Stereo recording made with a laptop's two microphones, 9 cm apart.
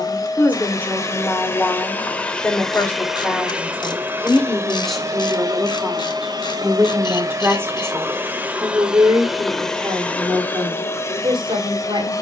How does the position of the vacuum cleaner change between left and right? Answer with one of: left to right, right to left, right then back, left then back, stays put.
right then back.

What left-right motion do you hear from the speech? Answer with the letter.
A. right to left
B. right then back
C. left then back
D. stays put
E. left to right
E.